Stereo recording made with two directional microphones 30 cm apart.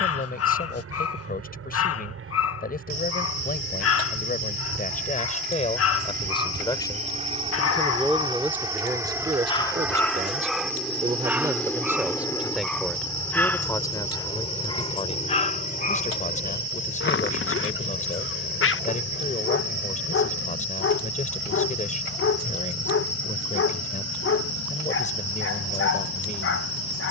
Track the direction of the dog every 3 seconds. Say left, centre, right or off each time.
left, left, left, centre, centre, left, left, left, left.